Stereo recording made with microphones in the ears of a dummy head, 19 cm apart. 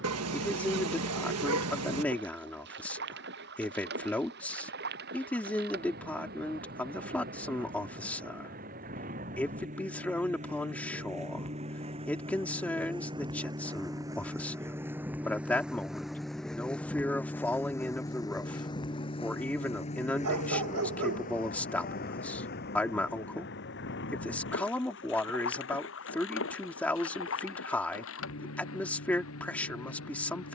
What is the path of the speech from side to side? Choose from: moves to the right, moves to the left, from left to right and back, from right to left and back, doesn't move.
doesn't move.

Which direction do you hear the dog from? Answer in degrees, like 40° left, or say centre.
90° right.